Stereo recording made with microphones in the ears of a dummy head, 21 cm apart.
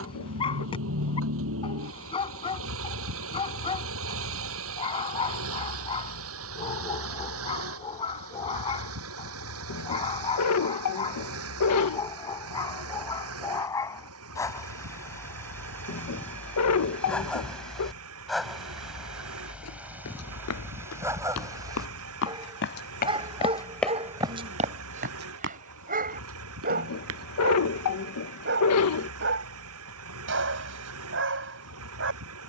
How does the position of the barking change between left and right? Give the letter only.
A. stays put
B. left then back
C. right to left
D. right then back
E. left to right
E.